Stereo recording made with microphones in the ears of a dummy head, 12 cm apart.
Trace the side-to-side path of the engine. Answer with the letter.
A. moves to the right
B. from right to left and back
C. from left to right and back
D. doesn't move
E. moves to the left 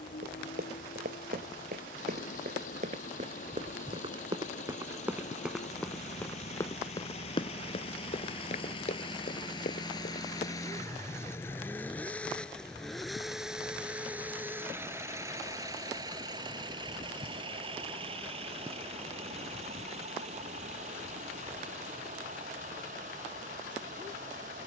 A.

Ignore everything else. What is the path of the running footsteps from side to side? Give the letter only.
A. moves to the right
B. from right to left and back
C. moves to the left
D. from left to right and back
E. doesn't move
C.